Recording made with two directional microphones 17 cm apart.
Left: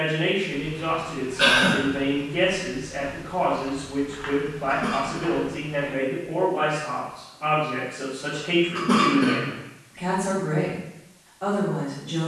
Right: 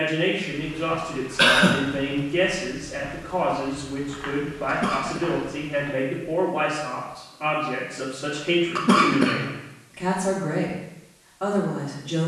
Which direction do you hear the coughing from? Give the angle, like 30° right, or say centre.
50° right.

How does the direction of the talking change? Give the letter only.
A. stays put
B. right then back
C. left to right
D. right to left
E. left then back
A.